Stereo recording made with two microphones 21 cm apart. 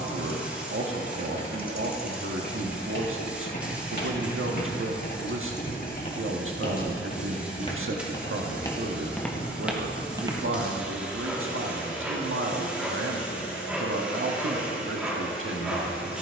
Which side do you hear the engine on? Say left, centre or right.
left.